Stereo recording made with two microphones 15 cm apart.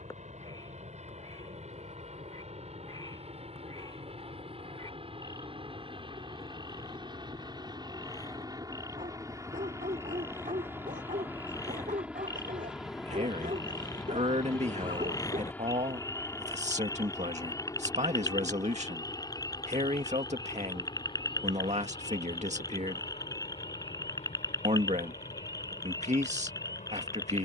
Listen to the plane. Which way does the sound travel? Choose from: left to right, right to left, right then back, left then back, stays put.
right to left.